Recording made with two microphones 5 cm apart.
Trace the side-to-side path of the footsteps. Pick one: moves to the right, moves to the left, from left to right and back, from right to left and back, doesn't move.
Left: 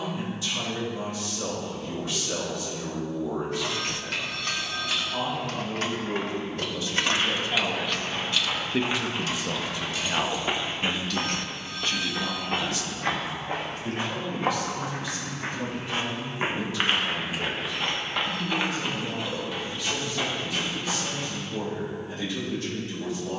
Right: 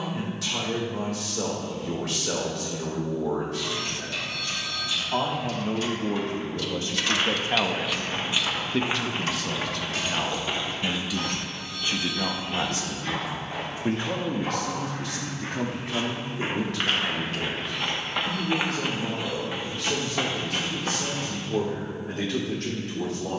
from right to left and back.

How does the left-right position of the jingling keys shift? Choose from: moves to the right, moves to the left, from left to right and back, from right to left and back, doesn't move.
moves to the right.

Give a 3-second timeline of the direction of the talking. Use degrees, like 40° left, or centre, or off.
80° right, 70° right, 30° right, centre, 50° right, 70° right, 70° right, 70° right.